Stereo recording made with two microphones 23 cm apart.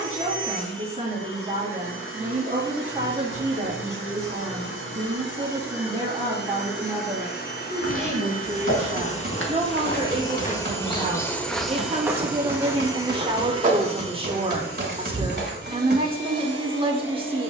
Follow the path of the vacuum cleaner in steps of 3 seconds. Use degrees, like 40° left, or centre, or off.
60° left, 50° left, 40° left, 20° left, 20° right, 50° right.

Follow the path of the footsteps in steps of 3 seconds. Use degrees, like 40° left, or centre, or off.
off, off, 70° left, 30° left, 30° right, 50° right.